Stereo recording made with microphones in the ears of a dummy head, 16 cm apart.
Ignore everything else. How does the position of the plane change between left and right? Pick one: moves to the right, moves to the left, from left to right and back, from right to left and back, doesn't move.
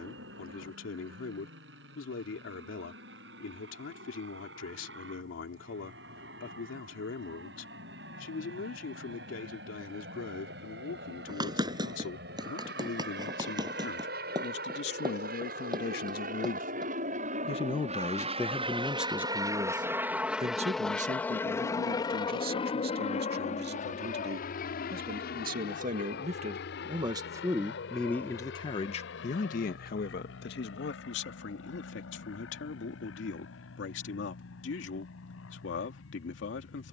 moves to the left.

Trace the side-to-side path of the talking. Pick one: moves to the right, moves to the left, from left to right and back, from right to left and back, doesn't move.
from left to right and back.